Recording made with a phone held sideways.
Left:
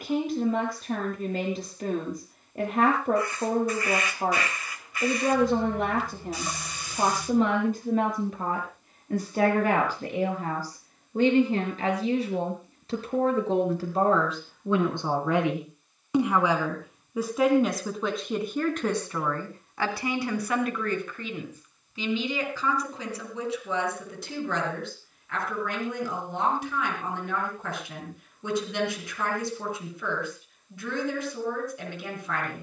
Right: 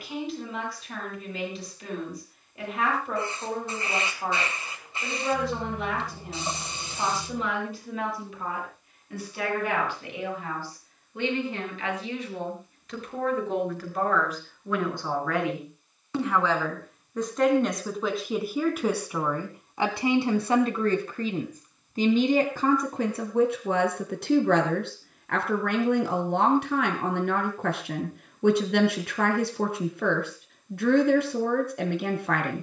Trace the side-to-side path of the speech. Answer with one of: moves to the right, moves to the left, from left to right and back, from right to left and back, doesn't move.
moves to the right.